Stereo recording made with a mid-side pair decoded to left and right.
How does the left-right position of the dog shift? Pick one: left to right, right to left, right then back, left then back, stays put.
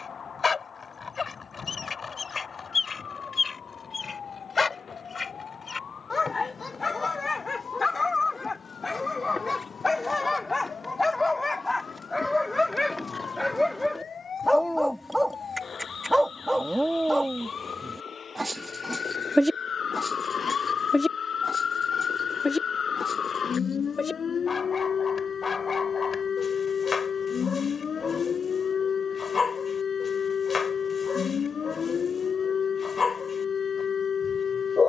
right then back.